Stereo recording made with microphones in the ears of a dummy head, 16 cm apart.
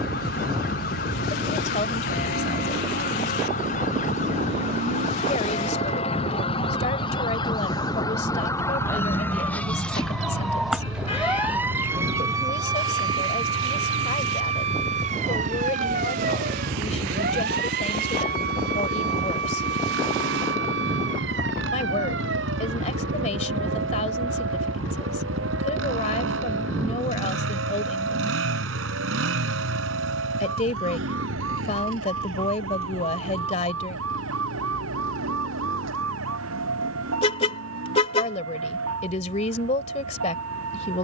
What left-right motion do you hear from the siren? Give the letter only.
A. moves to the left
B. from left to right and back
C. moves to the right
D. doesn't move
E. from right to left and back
C.